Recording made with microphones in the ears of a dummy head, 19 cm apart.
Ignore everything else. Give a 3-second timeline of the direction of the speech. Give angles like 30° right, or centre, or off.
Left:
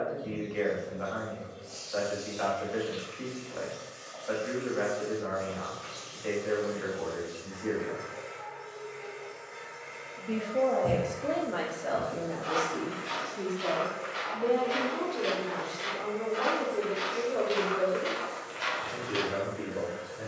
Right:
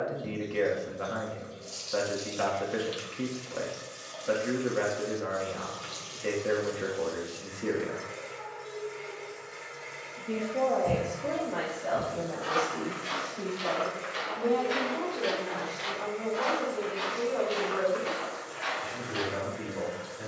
50° right, 50° right, 40° right, 10° left, 30° left, 40° left, 40° left.